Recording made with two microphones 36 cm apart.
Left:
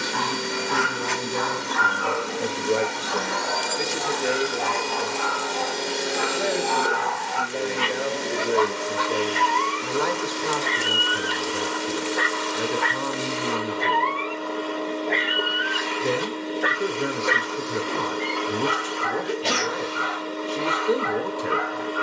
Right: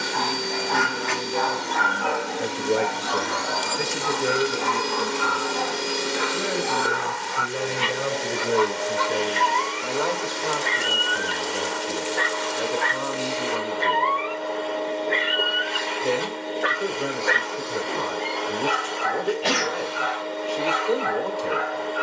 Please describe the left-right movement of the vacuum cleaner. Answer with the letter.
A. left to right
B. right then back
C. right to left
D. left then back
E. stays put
C.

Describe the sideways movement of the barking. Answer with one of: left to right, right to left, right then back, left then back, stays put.
right then back.